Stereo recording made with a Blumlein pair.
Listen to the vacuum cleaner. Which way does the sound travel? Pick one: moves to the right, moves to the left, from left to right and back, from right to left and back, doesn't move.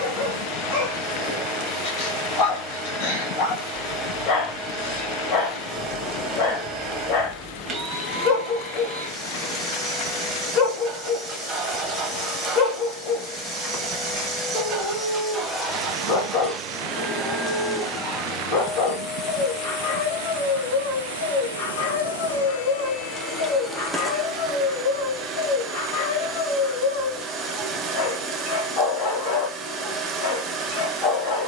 from right to left and back.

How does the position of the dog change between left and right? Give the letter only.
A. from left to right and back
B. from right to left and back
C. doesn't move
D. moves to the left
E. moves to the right
C.